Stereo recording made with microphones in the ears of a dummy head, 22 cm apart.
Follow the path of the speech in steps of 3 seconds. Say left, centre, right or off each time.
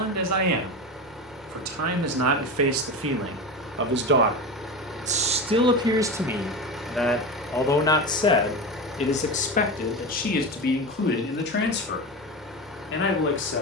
right, right, centre, left, left.